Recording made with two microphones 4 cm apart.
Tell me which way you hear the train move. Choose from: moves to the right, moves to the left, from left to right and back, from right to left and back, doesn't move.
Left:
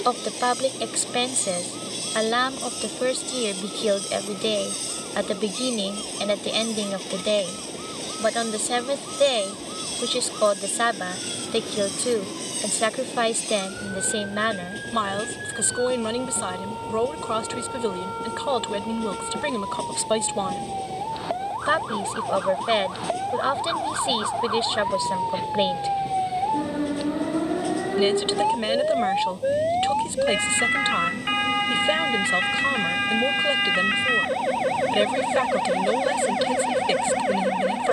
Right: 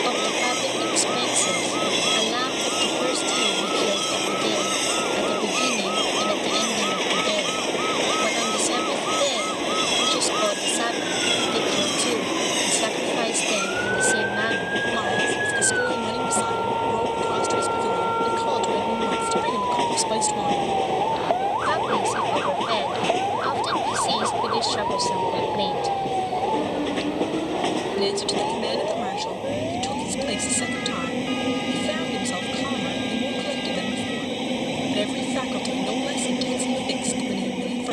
doesn't move.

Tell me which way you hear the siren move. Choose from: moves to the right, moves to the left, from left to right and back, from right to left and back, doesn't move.
moves to the left.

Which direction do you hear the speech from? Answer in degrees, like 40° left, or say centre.
20° left.